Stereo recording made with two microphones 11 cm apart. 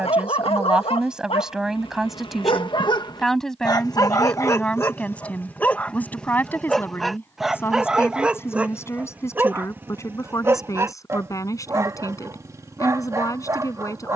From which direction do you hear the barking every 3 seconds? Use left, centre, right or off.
left, left, centre, right, right.